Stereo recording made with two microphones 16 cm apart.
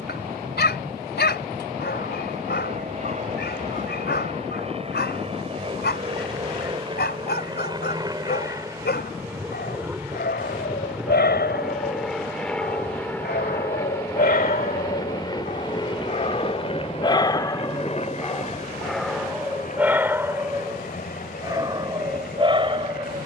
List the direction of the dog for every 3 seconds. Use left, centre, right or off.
left, left, left, left, left, left, centre, right.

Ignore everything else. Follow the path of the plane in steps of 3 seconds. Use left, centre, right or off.
right, right, right, centre, centre, left, left, left.